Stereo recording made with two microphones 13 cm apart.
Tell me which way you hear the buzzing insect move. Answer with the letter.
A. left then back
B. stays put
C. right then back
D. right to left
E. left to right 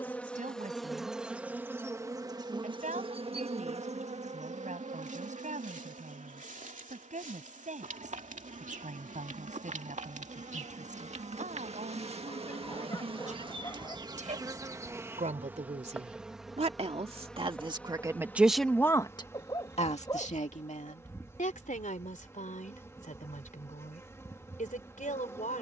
C.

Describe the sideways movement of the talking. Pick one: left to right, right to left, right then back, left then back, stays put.
right to left.